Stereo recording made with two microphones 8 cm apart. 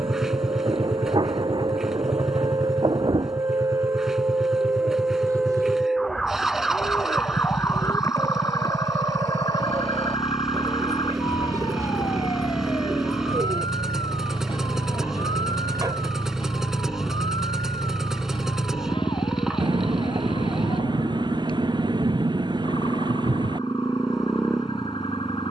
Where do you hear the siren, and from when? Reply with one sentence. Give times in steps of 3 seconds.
In this clip you hear the siren on the right from 0 s and on the left from 6 s.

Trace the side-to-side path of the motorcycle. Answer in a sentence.
In this clip you hear the motorcycle stay put.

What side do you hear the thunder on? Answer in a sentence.
In this clip you hear the thunder on the right.